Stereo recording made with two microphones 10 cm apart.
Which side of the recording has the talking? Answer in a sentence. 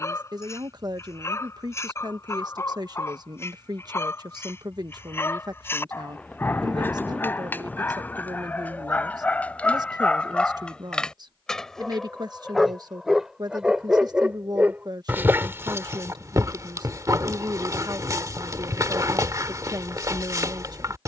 You can hear the talking on the right.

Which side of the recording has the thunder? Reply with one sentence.
In this clip you hear the thunder in the centre.